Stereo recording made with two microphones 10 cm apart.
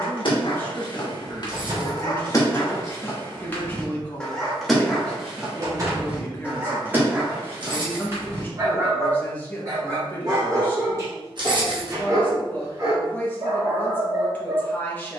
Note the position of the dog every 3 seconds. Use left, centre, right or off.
left, centre, right, right, right.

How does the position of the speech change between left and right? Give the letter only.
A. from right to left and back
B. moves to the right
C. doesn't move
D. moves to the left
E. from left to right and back
C.